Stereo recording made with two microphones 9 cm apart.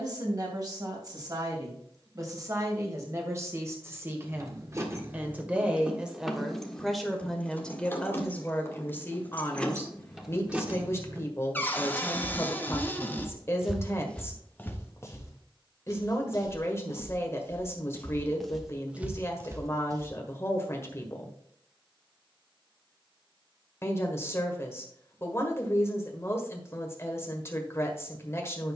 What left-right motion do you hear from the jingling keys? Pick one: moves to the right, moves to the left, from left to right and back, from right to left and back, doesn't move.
from right to left and back.